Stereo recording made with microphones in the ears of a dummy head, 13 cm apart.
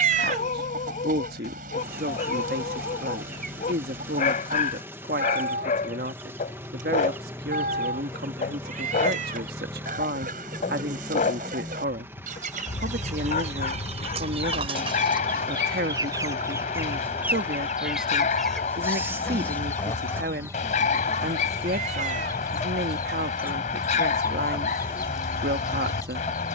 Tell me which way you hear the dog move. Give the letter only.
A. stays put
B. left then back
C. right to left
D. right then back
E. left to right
A.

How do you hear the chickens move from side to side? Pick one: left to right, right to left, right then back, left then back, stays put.
right to left.